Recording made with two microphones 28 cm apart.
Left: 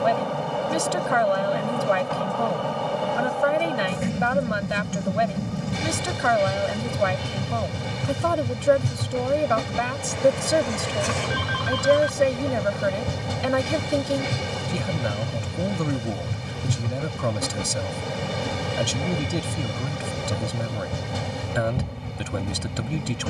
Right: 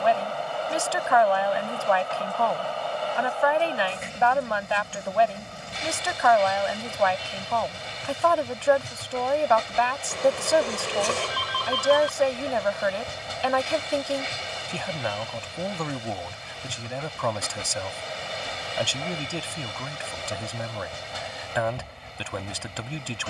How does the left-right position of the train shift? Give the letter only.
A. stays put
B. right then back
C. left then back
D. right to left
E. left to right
A.